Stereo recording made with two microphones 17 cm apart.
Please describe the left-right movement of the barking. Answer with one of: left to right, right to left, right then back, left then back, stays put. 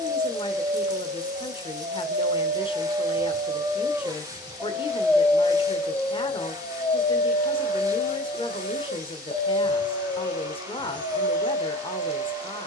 right to left.